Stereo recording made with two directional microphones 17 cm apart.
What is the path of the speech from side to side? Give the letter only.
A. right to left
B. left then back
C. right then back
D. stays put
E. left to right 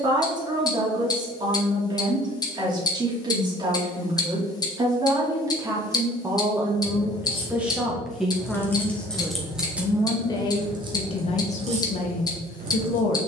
A.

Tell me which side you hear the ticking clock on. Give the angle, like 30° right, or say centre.
20° left.